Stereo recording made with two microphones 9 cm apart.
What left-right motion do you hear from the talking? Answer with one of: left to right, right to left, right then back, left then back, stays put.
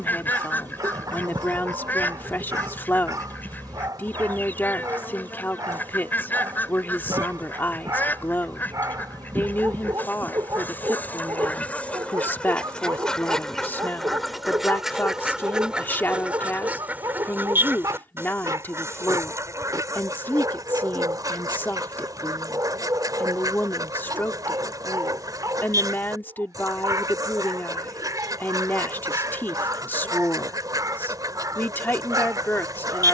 stays put.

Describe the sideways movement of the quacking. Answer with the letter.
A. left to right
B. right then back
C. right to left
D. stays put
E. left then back
A.